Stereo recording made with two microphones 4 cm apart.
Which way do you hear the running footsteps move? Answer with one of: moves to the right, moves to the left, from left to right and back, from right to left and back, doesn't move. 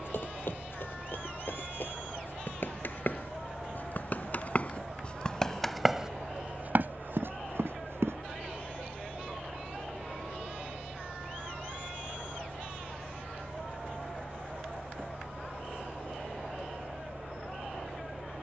moves to the right.